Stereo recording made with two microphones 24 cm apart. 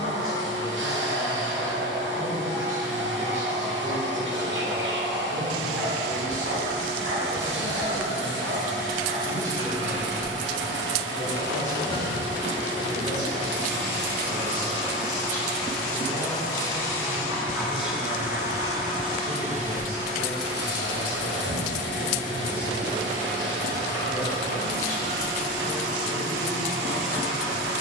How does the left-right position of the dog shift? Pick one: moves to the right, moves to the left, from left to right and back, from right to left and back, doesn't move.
from right to left and back.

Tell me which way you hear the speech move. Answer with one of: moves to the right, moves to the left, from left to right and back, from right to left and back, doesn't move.
from right to left and back.